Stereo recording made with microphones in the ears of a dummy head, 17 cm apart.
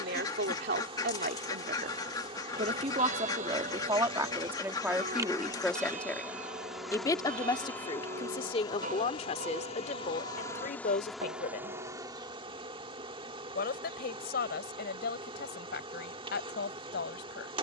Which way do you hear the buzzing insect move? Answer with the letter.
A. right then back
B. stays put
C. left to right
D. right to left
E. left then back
E.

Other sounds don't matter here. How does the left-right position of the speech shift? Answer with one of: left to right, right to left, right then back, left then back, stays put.
right to left.